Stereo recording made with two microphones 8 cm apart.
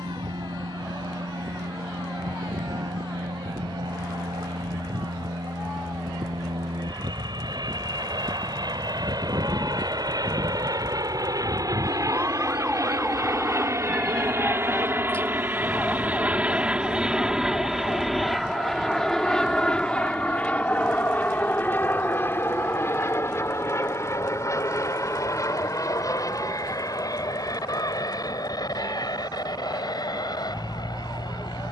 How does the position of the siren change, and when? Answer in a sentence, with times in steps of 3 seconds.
You can hear the siren on the right from 0 s, in the centre from 12 s and on the left from 15 s.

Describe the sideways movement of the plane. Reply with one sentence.
You can hear the plane travel towards the left.